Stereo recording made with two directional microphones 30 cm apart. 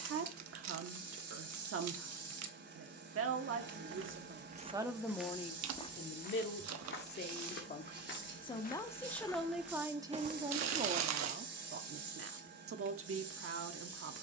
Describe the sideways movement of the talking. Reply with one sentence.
You can hear the talking go left and come back.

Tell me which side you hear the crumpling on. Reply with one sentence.
You can hear the crumpling on the right.